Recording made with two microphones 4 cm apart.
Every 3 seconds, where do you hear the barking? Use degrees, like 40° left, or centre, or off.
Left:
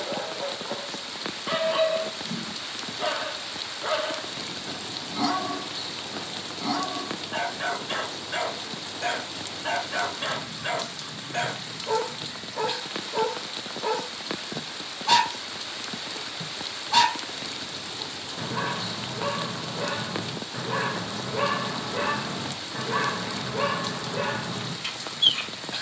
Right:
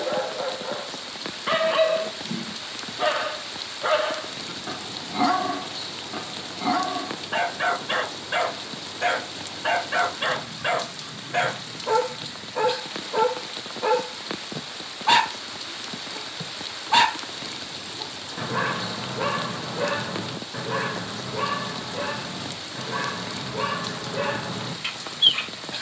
30° right, 30° right, 30° right, 30° right, 30° right, 30° right, 20° right, 10° left, 20° right.